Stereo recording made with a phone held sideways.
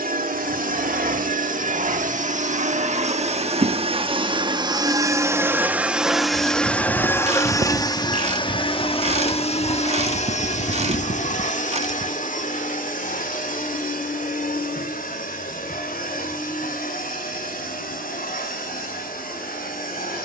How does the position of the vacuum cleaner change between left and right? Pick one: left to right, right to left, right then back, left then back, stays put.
right to left.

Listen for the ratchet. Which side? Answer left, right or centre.
right.